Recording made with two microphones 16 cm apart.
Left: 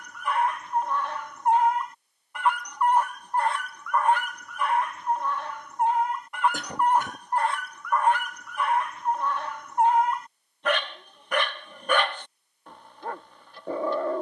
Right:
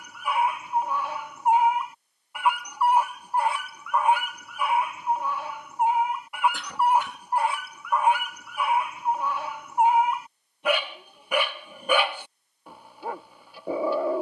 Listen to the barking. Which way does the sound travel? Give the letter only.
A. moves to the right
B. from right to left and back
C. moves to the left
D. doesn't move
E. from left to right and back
D.